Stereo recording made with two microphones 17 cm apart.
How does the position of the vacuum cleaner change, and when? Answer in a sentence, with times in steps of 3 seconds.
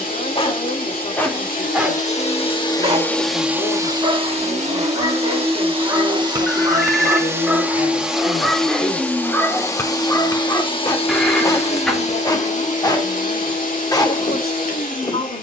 In this clip you hear the vacuum cleaner on the left from 0 s, on the right from 3 s, in the centre from 6 s and on the left from 9 s.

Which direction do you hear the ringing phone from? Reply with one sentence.
You can hear the ringing phone in the centre.